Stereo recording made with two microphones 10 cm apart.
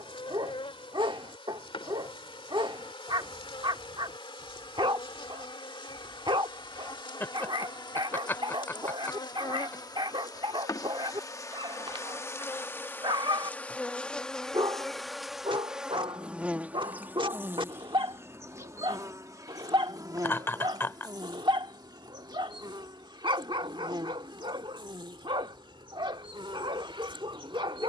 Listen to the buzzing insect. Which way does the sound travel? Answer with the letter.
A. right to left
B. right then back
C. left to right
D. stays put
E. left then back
C.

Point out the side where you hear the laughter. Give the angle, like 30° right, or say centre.
30° left.